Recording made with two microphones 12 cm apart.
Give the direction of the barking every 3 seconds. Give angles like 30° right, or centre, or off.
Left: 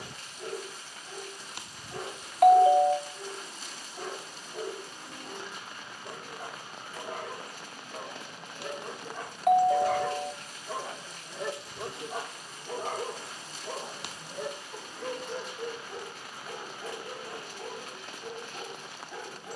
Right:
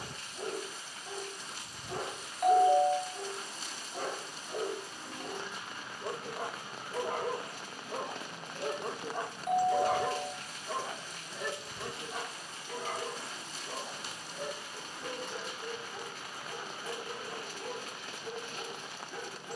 70° right, 60° right, 50° right, centre, 50° left, 70° left, 70° left.